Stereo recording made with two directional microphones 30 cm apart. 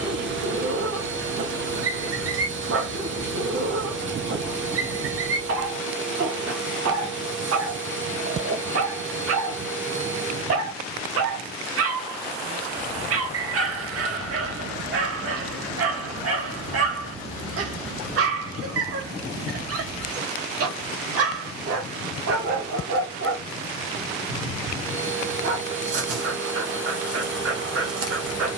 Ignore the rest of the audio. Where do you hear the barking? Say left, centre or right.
right.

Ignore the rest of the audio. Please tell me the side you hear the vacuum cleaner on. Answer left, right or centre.
right.